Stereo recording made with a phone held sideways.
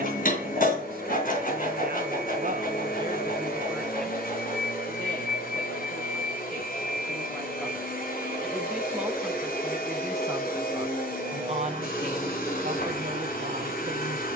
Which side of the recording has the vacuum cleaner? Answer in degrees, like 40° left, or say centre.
70° left.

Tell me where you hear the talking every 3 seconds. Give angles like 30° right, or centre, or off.
60° right, centre, centre, 20° right, 60° right.